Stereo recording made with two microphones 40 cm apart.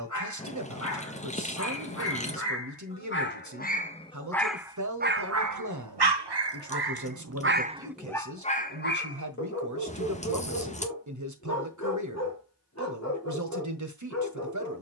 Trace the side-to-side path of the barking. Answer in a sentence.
In this clip you hear the barking move from left to right and back again.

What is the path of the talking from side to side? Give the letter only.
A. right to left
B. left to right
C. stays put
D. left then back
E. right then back
C.